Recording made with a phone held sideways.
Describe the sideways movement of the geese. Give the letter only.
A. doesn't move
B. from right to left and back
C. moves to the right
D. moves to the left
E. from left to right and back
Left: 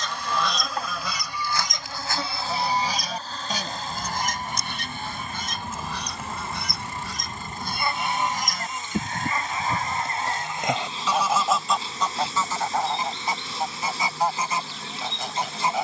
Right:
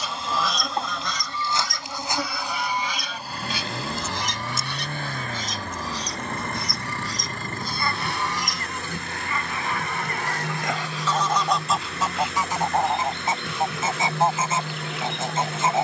B.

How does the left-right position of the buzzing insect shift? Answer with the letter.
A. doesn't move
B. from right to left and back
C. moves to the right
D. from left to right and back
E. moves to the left
E.